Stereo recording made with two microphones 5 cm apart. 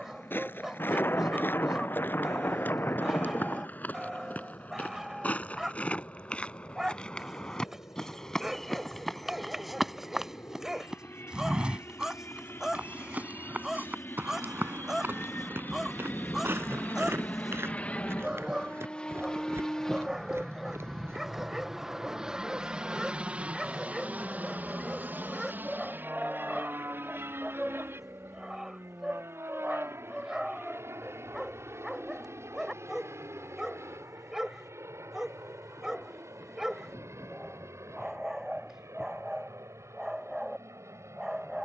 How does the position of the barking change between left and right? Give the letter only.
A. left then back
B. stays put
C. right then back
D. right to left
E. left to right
B.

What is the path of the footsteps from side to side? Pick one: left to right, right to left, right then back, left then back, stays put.
left to right.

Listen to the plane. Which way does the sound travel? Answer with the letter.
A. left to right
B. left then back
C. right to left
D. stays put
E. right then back
A.